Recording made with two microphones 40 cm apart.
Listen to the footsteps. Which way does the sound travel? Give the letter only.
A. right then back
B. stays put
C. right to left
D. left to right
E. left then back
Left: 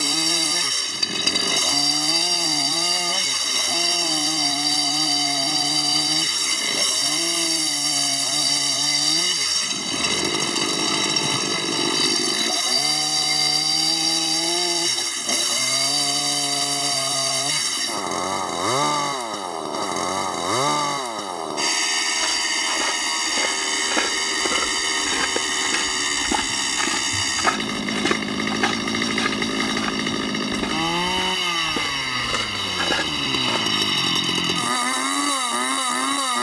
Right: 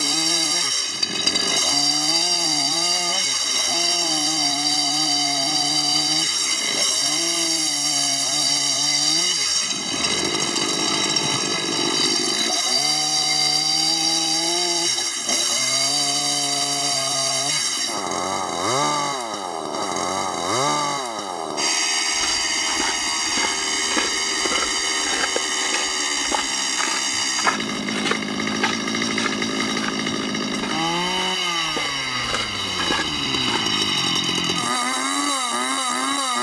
E.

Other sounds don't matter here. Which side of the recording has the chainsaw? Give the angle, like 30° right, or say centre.
centre.